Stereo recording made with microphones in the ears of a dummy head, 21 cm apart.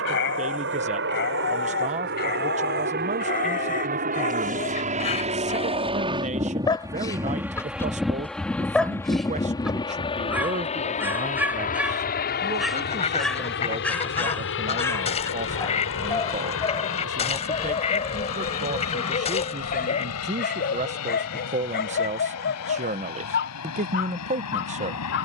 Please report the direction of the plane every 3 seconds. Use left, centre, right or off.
right, right, centre, left, left, left, left, left, left.